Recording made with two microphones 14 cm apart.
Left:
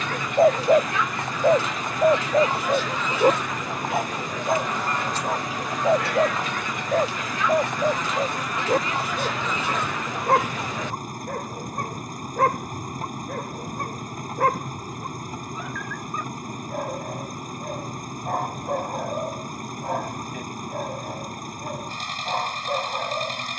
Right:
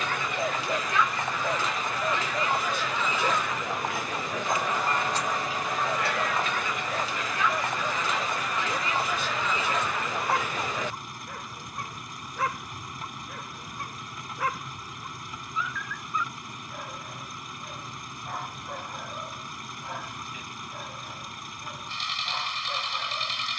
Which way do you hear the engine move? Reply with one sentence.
You can hear the engine stay put.